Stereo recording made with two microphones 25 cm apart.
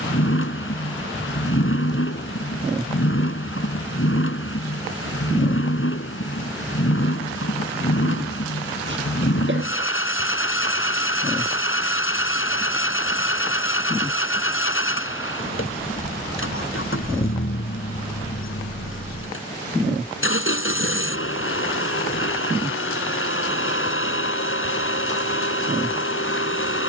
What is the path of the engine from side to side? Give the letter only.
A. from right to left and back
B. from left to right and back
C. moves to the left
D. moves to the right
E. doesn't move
E.